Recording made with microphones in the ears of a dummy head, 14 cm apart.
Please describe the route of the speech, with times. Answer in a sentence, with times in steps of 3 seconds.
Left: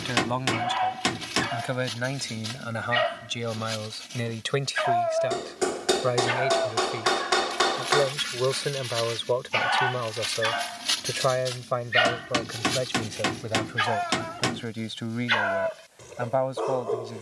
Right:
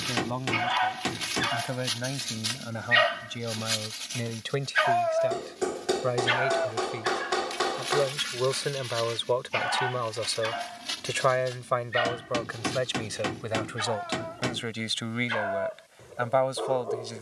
You can hear the speech on the left from 0 s, in the centre from 6 s and on the right from 9 s.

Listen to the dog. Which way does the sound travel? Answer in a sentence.
You can hear the dog travel towards the left.